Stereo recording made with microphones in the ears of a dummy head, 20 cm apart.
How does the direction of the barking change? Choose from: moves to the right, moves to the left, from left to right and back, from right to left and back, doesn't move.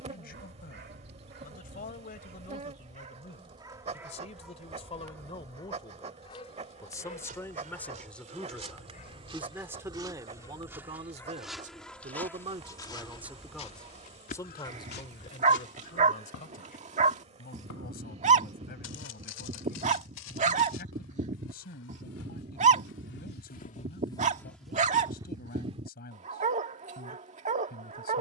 from right to left and back.